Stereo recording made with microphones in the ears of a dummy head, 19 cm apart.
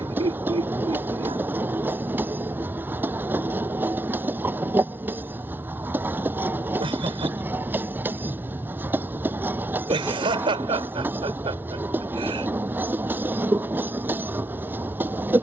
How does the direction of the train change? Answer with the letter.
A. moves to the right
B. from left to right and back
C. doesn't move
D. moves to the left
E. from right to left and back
C.